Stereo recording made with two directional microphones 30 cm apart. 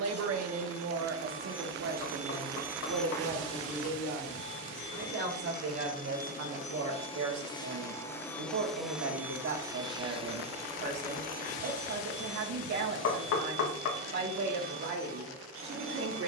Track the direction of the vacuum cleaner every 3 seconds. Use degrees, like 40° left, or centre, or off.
40° right, 30° left, 10° left, 20° right, 50° right, 50° right.